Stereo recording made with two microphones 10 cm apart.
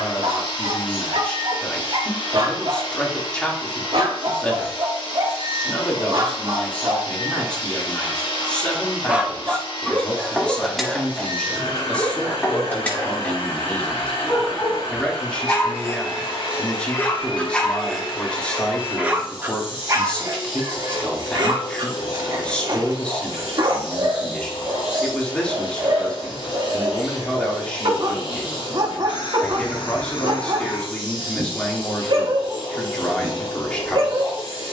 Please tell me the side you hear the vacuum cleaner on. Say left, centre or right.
left.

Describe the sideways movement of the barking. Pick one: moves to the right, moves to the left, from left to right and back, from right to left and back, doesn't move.
from right to left and back.